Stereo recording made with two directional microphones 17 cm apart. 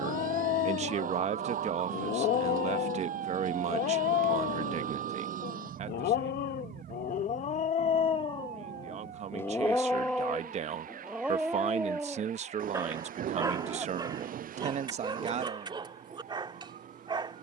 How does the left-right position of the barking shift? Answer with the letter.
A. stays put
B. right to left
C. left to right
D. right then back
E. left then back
C.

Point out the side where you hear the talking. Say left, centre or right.
right.